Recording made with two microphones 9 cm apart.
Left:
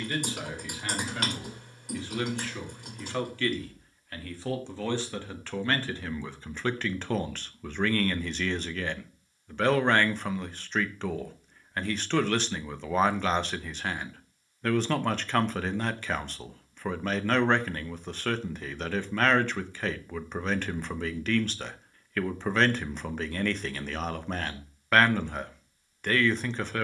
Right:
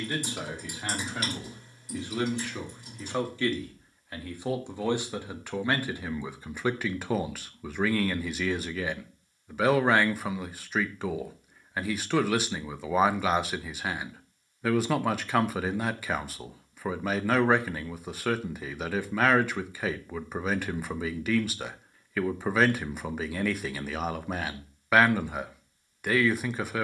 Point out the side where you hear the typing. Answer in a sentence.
You can hear the typing on the left.